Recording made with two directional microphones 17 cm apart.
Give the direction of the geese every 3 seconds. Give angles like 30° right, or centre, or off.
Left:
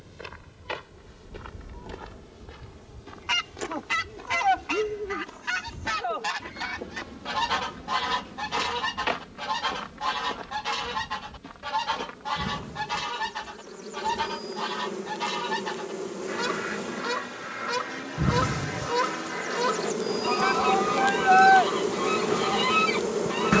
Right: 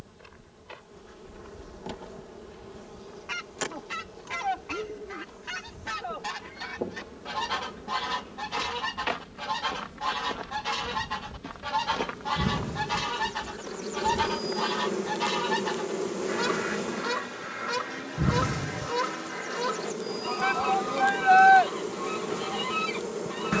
50° left, 40° left, 20° left, 10° left, 10° right, centre, 20° left, 40° left.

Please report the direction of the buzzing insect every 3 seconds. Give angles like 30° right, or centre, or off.
40° right, 40° right, 40° right, 40° right, 30° right, 20° right, 10° left, 30° left.